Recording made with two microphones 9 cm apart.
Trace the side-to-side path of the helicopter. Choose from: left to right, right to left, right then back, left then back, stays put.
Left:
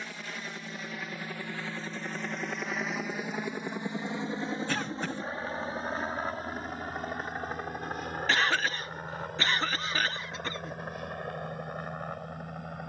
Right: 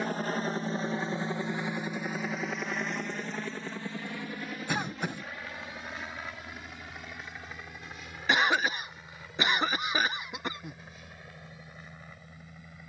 right to left.